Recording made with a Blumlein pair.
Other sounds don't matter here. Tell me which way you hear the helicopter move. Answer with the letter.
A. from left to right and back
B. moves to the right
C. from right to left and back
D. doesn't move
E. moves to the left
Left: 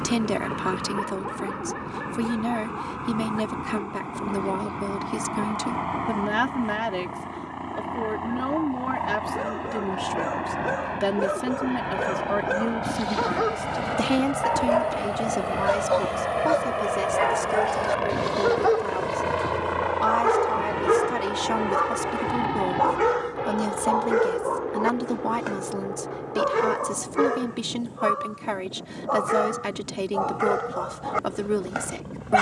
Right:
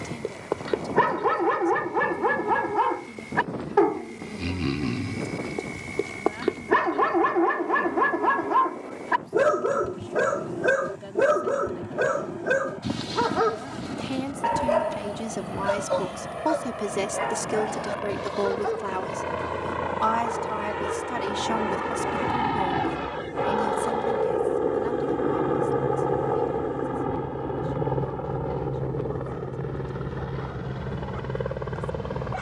B.